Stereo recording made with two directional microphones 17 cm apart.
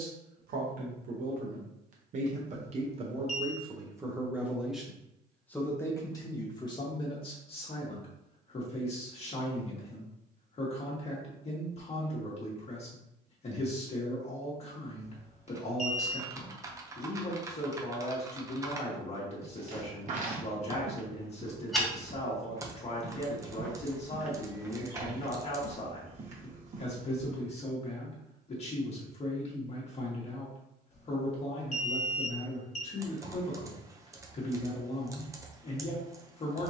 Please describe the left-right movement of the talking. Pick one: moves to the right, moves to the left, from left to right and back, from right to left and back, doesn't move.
moves to the left.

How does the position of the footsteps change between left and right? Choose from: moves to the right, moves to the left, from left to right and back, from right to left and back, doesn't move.
from right to left and back.